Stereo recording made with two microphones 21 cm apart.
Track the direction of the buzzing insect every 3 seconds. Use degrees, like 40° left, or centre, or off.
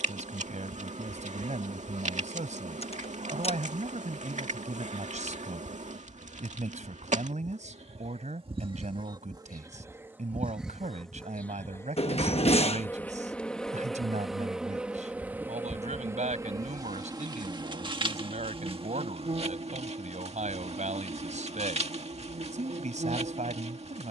40° right, 40° right, 30° right, centre, centre, 20° right, 30° right, 30° right.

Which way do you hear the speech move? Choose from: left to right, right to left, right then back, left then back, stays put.
stays put.